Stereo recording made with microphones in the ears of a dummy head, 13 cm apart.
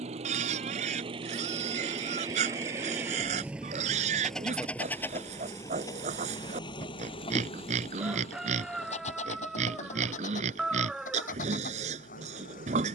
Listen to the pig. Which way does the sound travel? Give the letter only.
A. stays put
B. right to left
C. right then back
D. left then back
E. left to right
A.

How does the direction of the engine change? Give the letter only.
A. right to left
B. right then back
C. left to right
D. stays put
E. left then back
A.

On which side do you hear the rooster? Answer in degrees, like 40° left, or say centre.
centre.